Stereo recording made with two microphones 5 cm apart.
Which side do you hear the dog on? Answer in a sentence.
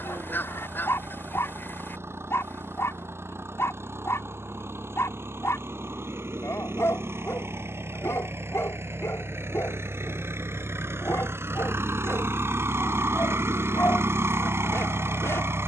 You can hear the dog on the left.